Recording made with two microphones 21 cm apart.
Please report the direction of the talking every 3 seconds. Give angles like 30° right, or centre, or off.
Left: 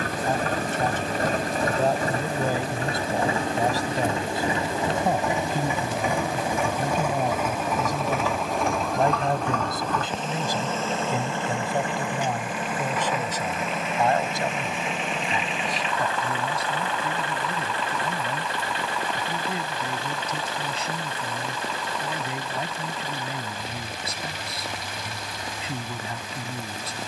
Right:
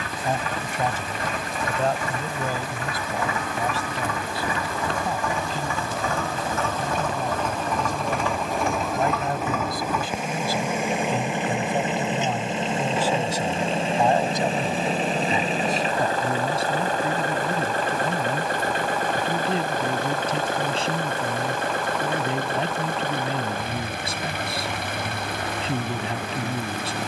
centre, 50° left, 50° left, 20° left, 10° right, 30° right, 30° right, 30° right, 30° right.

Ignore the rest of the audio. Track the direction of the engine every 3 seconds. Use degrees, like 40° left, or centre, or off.
40° left, 30° left, 10° left, 10° right, 30° right, 40° right, 50° right, 60° right, 60° right.